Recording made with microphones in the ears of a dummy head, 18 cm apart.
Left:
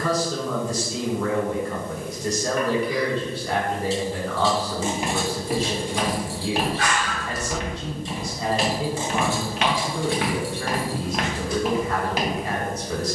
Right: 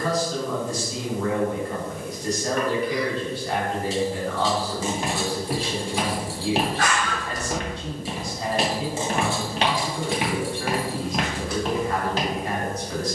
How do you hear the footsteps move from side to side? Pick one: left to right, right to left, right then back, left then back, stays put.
right then back.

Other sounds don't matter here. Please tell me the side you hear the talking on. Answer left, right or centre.
left.